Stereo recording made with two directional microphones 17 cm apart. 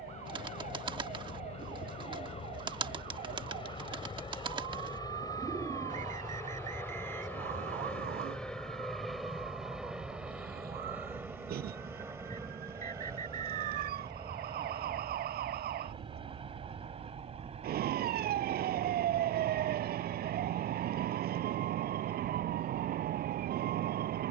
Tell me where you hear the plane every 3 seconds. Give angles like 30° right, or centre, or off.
40° left, 30° left, 10° left, 10° right, 20° right, 30° right, 40° right, 40° right.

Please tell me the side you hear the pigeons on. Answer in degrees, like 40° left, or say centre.
30° right.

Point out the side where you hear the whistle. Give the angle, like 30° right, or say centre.
50° right.